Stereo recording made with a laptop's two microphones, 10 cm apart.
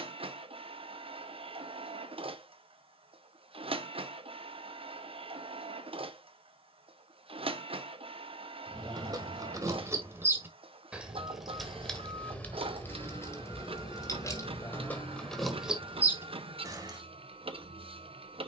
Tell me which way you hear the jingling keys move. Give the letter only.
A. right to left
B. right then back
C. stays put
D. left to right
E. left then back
E.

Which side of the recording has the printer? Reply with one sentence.
In this clip you hear the printer on the right.